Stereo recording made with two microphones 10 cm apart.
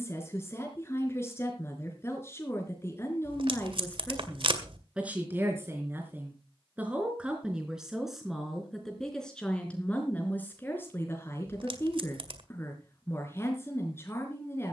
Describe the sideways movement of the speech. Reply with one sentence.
You can hear the speech move from left to right and back again.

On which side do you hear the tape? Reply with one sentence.
In this clip you hear the tape on the right.